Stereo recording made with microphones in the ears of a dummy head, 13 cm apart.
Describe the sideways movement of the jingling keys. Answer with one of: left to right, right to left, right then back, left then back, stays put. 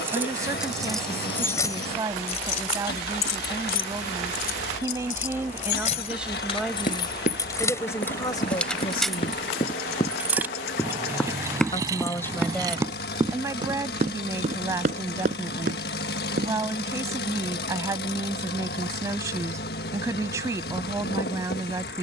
left then back.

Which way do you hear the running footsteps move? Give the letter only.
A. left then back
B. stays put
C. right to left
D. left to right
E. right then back
D.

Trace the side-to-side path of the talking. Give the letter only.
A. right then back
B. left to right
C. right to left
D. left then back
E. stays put
D.